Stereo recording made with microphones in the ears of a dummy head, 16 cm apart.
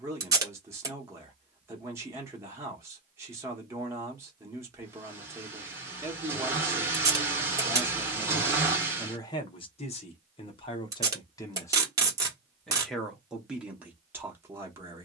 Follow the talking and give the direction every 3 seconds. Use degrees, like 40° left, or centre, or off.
10° right, 10° right, 10° right, 30° left, 10° right.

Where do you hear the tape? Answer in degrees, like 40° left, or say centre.
20° right.